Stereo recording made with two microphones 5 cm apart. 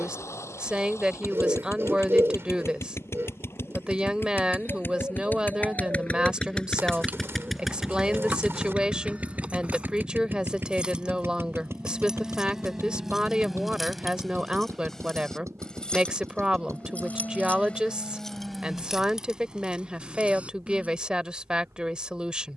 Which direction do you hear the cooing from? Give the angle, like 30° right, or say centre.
60° right.